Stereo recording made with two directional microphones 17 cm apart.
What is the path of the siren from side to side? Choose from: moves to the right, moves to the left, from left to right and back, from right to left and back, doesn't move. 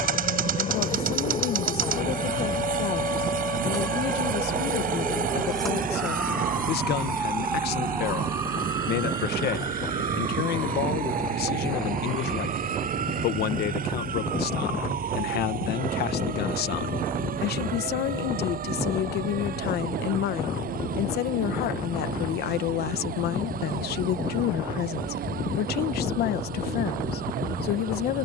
moves to the right.